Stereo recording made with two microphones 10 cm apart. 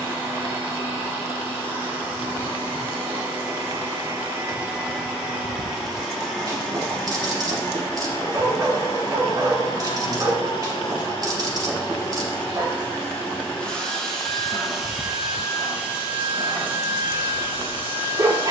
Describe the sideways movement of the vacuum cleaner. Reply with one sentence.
You can hear the vacuum cleaner move from right to left and back again.